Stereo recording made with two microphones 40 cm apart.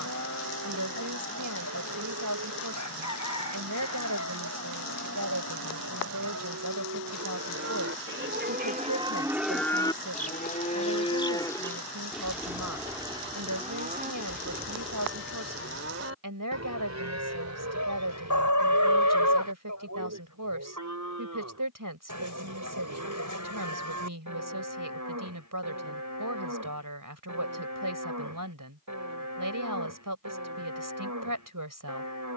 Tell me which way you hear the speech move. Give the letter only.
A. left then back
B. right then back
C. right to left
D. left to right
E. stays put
E.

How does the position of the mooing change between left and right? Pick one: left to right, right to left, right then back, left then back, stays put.
left then back.